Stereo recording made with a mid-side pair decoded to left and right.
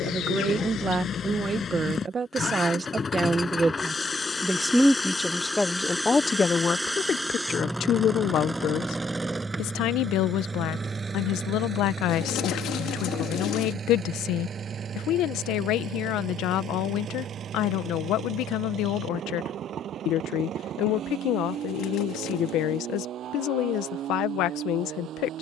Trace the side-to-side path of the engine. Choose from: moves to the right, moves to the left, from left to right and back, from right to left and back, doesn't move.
moves to the right.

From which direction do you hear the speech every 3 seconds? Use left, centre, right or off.
right, centre, left, left, left, left, left, left, left.